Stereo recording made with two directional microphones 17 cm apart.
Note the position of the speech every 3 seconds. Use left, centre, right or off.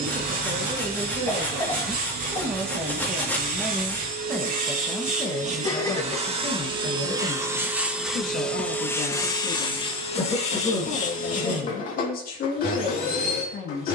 right, centre, left, left, left.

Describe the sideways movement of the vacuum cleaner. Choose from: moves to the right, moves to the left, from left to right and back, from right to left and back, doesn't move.
moves to the left.